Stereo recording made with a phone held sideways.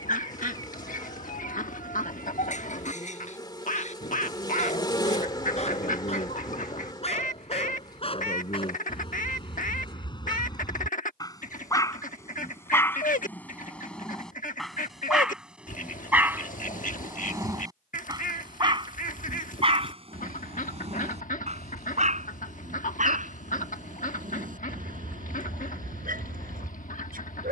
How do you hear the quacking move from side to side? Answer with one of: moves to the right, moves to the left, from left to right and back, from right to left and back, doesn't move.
doesn't move.